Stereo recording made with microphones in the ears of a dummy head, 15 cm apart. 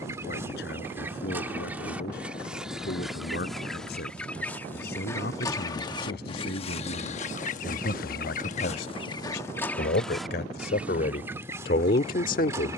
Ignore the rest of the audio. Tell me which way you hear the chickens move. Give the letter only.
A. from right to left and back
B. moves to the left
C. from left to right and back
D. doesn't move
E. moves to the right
A.